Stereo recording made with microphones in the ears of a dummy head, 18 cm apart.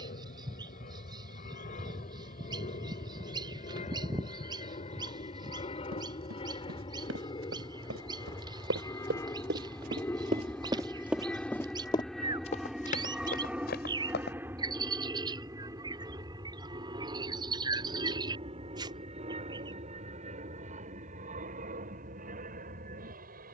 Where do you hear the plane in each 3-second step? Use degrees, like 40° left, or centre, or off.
50° left, 40° left, 30° left, 10° left, 10° right, 20° right, 30° right, 40° right.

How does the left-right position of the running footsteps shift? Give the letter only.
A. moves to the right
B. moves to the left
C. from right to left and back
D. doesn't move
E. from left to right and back
B.